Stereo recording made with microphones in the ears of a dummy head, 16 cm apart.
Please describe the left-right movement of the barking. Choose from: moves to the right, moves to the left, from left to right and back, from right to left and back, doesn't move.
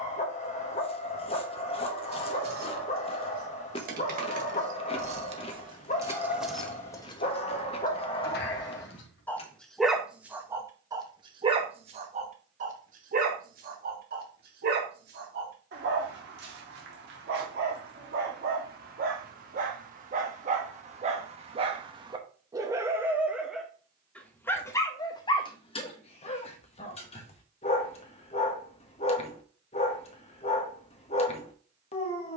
from left to right and back.